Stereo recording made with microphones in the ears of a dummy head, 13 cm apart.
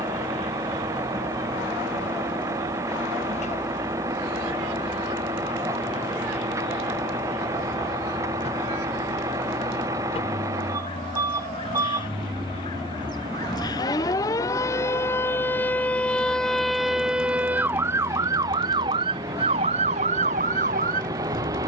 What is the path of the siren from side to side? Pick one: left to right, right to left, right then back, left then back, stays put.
left to right.